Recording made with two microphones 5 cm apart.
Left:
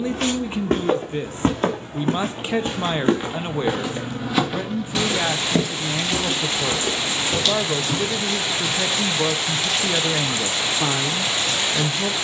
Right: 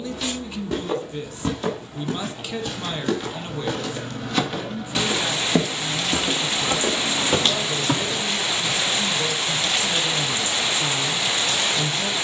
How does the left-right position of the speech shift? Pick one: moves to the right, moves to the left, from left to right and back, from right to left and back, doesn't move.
doesn't move.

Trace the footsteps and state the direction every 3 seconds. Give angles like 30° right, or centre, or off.
50° left, 10° left, 40° right, off.